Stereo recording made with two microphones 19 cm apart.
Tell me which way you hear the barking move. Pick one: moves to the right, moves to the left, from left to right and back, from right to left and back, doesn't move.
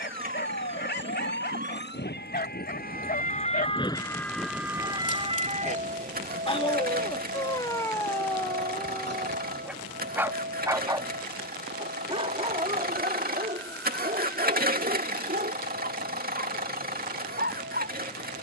moves to the right.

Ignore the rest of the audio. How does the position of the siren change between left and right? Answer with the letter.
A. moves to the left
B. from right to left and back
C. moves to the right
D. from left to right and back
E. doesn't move
C.